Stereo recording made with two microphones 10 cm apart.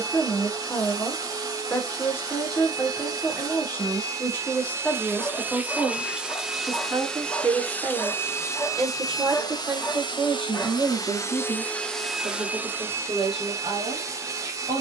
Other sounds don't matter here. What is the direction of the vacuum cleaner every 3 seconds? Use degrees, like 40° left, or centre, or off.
40° right, 30° right, 10° left, 40° left, 20° right.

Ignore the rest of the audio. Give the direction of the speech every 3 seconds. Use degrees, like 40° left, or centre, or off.
20° left, 10° left, 30° right, 60° right, 70° right.